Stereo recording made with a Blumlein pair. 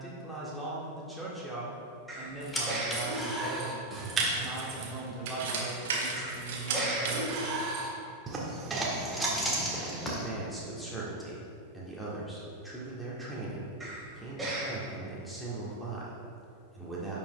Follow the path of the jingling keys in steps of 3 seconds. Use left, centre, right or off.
centre, right, right, centre, off, off.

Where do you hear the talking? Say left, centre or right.
centre.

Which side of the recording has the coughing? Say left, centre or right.
centre.